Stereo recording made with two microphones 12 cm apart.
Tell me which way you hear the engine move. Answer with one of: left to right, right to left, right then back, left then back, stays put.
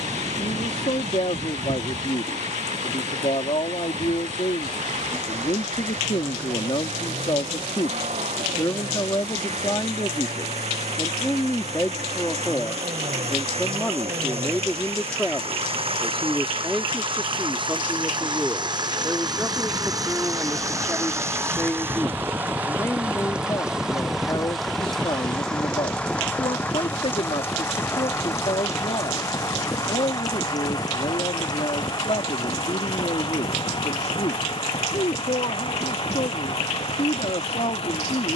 right to left.